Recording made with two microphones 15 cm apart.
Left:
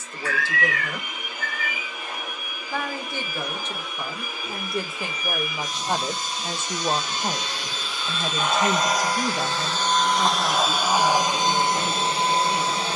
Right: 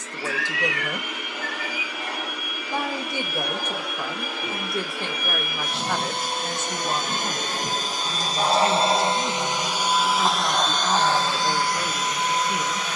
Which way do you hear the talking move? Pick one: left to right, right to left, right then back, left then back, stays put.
left then back.